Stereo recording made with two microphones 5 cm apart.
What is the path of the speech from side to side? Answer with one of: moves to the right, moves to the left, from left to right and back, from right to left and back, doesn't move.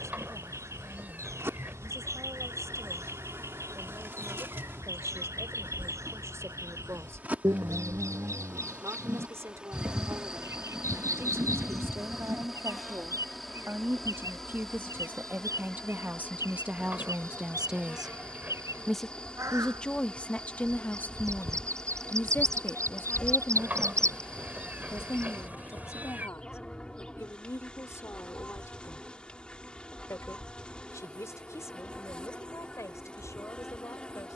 moves to the left.